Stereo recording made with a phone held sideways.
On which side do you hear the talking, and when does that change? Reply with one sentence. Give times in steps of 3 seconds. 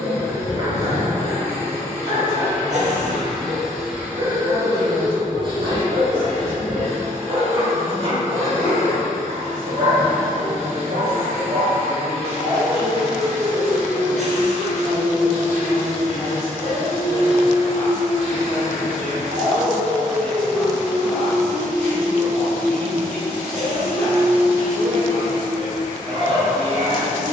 You can hear the talking on the right from 0 s and in the centre from 12 s.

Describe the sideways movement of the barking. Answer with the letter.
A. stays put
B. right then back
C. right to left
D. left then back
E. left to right
A.